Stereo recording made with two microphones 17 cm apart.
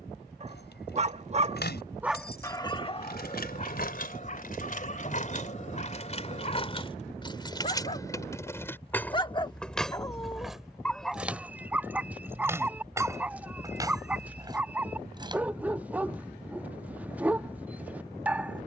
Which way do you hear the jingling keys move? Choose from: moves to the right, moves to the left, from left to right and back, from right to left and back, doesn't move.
moves to the right.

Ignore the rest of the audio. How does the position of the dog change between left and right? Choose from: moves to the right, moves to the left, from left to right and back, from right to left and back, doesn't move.
from right to left and back.